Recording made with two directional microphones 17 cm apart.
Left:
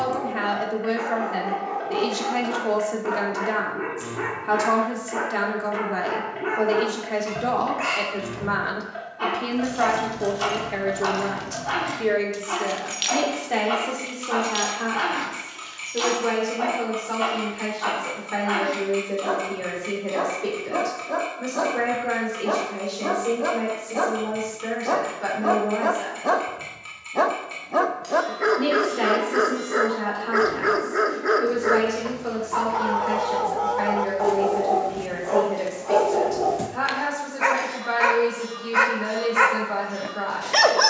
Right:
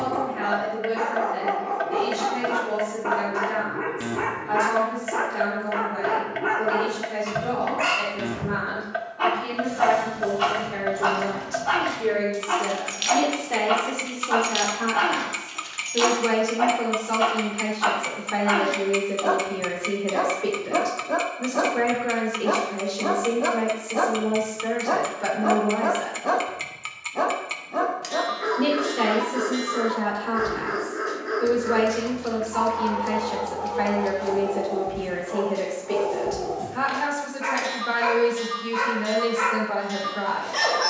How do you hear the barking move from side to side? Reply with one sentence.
In this clip you hear the barking move to the left.